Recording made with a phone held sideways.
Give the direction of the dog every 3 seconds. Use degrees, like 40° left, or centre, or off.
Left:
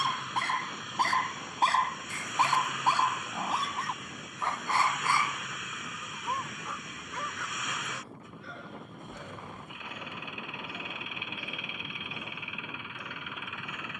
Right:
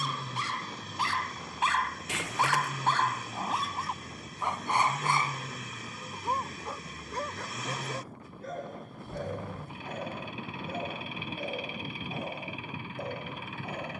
40° left, 10° right, 40° right, 50° right, 50° right.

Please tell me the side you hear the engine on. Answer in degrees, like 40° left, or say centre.
30° right.